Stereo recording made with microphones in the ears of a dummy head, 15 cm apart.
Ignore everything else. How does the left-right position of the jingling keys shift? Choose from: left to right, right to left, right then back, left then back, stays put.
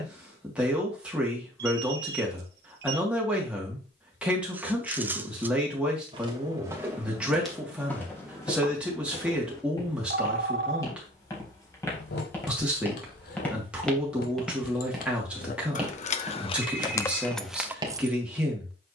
left to right.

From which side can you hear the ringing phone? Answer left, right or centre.
right.